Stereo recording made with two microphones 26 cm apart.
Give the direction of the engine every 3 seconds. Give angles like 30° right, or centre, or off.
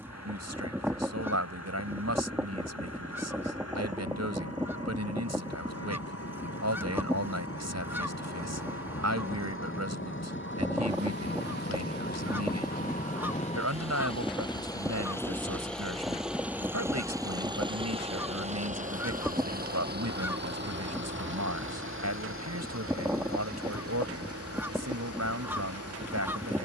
70° left, 60° left, 60° left, 50° left, 20° left, 10° right, 30° right, 50° right, 60° right.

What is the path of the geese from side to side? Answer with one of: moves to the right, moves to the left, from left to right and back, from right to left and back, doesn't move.
doesn't move.